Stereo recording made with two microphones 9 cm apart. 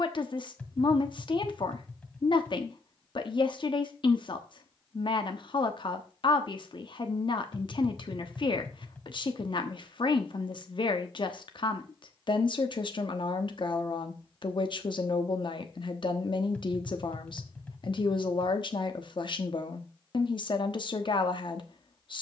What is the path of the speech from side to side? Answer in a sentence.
In this clip you hear the speech stay in one place.